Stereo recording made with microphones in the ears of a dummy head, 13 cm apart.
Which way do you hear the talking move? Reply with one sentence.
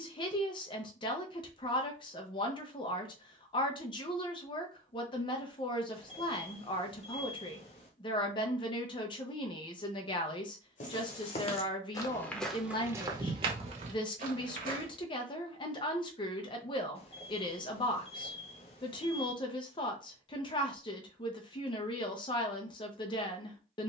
In this clip you hear the talking stay in one place.